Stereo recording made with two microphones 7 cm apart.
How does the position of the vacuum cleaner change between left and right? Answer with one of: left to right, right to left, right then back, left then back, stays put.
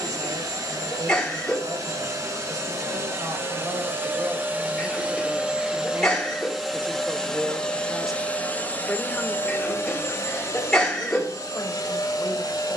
right to left.